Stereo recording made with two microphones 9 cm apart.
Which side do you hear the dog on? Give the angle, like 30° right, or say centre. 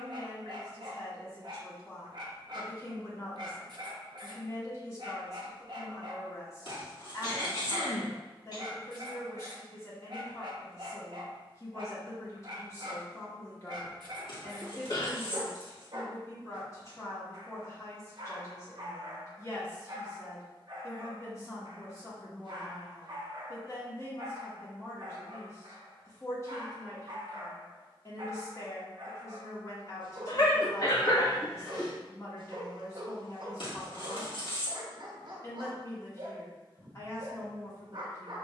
50° right.